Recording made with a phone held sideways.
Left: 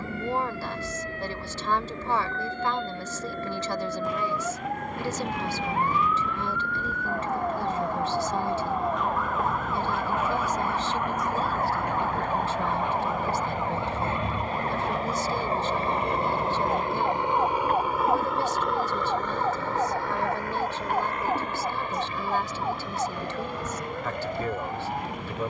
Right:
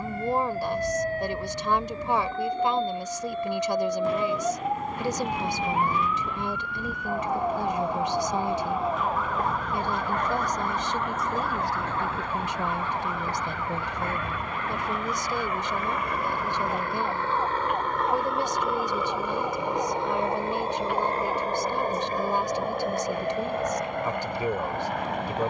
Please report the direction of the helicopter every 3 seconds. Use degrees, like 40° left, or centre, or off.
70° left, 70° left, 70° left, 60° left, 50° left, 30° left, 10° right, 40° right, 60° right.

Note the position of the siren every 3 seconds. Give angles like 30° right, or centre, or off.
40° right, 20° right, 10° right, 10° left, 20° left, 30° left, 40° left, 50° left, 50° left.